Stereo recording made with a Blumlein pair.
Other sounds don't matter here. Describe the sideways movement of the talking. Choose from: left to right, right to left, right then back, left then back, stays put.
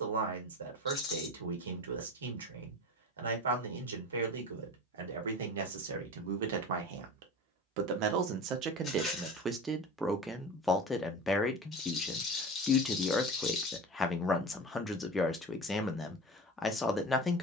right to left.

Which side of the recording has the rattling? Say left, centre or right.
left.